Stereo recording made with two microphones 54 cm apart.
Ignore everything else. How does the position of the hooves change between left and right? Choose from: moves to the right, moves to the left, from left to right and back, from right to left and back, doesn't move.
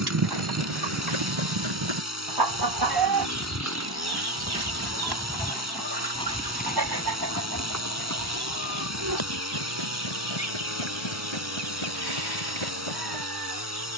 moves to the left.